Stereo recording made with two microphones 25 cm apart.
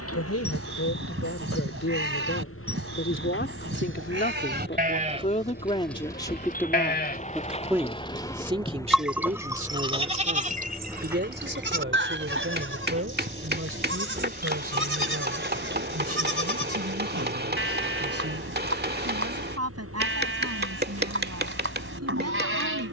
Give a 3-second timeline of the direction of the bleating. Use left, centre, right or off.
right, right, left, right, right, right, right, right.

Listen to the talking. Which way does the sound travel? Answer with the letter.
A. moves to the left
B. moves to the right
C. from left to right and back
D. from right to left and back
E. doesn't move
B.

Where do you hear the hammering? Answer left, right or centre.
right.